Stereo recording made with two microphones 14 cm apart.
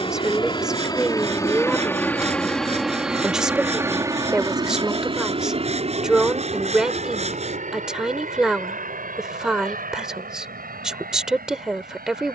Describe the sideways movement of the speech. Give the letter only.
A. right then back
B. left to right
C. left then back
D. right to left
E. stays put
E.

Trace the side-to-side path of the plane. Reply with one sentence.
You can hear the plane move from left to right.